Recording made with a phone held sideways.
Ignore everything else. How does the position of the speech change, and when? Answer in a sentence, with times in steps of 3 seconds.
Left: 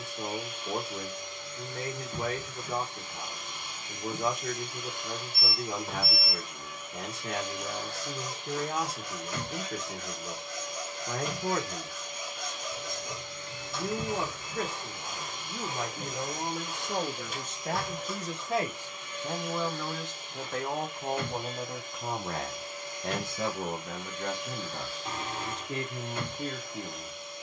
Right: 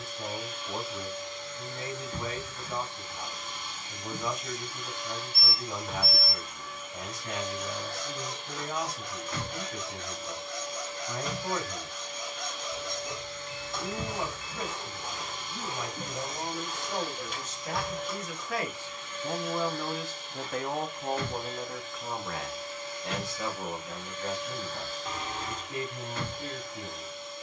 In this clip you hear the speech on the left from 0 s, in the centre from 18 s and on the left from 21 s.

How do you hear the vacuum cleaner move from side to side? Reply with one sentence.
In this clip you hear the vacuum cleaner stay in one place.